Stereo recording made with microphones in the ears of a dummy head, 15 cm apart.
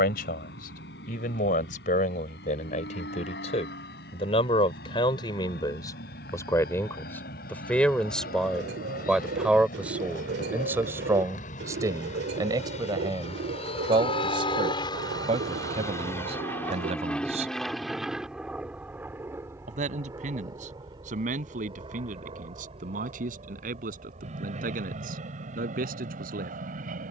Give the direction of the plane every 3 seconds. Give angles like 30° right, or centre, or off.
80° left, 70° left, 70° left, 60° left, 40° left, 10° left, 10° right, 30° right, 50° right.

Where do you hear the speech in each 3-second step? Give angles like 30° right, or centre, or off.
50° left, 30° left, 10° left, 10° right, 30° right, 40° right, 50° right, 50° right, 50° right.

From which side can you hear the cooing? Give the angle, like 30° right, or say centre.
70° right.